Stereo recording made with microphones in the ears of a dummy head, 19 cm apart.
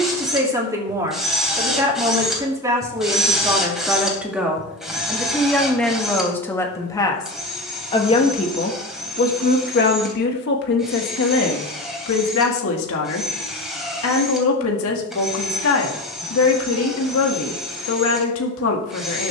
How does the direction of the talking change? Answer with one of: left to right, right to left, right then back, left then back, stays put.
right to left.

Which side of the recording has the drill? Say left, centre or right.
centre.